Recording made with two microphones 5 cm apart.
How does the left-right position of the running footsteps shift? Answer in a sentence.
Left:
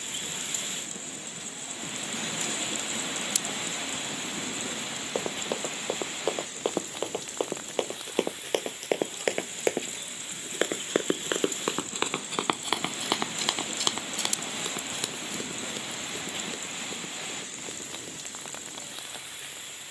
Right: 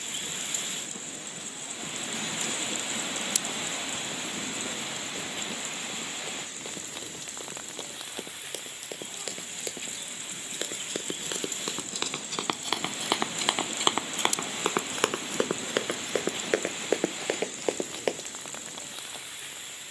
In this clip you hear the running footsteps move to the right.